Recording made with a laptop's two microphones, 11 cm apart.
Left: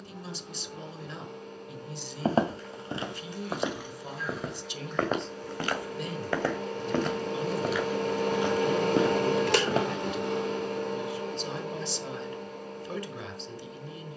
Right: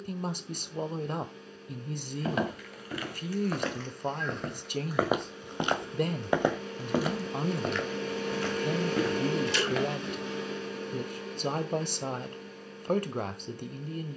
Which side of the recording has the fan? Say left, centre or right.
left.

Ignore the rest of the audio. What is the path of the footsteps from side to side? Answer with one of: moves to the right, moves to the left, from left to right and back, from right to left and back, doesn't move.
from left to right and back.